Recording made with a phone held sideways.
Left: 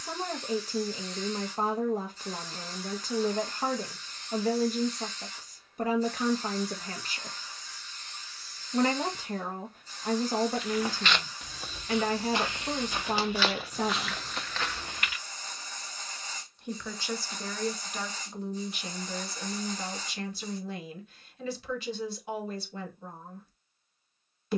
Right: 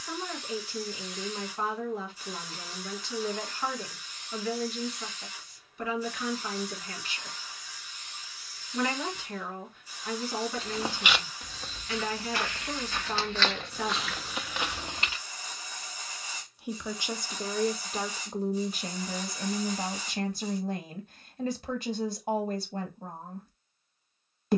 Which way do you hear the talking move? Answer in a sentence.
In this clip you hear the talking go from the left side to the right.